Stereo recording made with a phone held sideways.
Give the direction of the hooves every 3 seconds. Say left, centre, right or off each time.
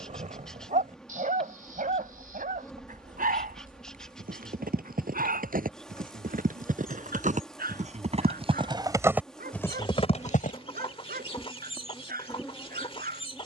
right, right, right, left, off.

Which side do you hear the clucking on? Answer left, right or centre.
left.